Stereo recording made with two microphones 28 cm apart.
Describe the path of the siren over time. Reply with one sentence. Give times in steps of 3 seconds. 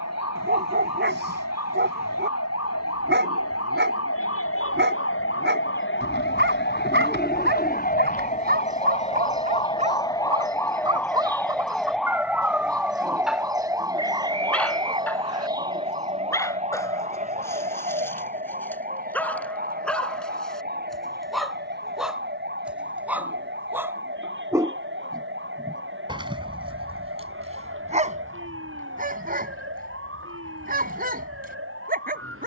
You can hear the siren on the left from 0 s, in the centre from 9 s and on the right from 15 s.